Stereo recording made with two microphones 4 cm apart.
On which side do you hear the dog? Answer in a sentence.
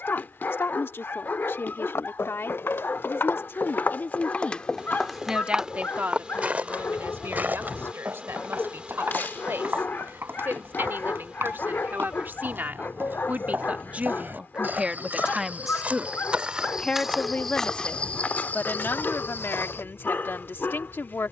In this clip you hear the dog on the left.